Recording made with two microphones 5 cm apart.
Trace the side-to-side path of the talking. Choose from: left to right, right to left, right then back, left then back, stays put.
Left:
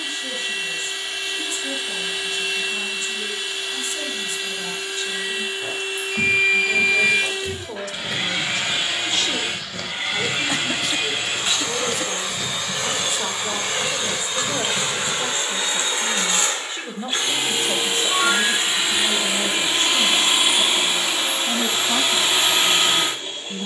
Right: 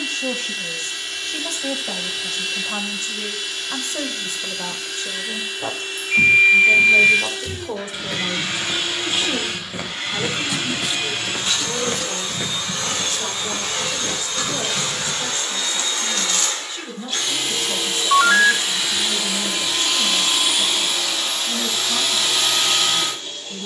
right to left.